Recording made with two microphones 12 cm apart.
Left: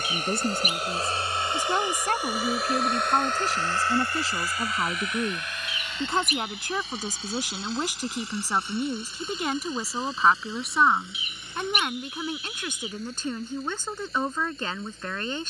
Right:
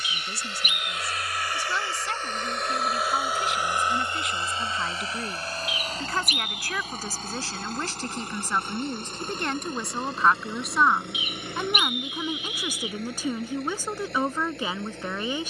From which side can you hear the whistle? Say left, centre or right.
left.